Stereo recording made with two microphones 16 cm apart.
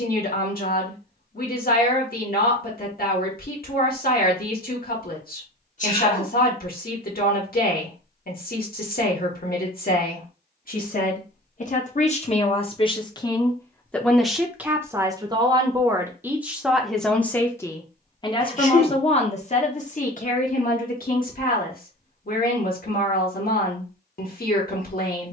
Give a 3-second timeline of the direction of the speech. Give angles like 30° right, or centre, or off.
60° left, 60° left, 60° left, 50° left, 20° left, 10° right, 40° left, 60° left, 60° left.